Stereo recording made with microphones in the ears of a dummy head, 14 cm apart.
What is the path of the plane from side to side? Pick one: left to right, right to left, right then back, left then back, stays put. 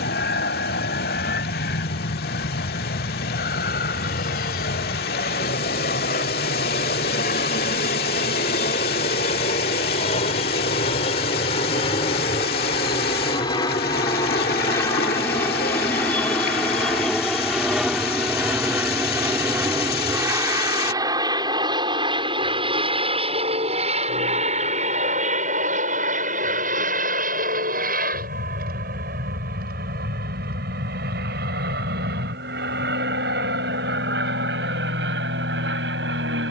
left to right.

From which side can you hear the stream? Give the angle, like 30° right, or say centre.
60° left.